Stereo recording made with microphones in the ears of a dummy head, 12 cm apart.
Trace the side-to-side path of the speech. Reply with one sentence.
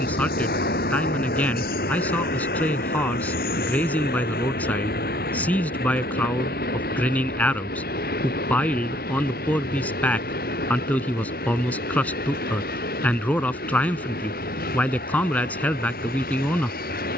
You can hear the speech stay put.